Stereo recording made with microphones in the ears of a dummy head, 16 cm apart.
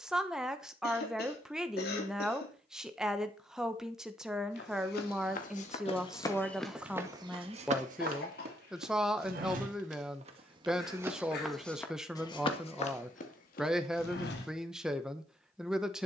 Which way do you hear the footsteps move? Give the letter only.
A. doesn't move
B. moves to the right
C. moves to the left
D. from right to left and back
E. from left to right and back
E.